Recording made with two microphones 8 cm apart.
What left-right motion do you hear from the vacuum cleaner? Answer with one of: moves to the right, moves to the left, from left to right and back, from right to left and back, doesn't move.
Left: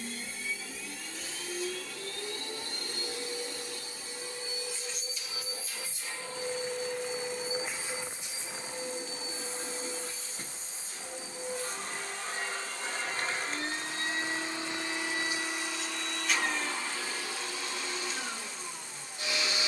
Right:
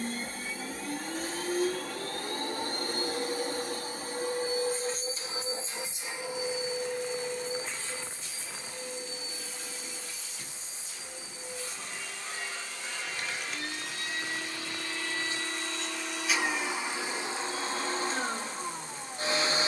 from right to left and back.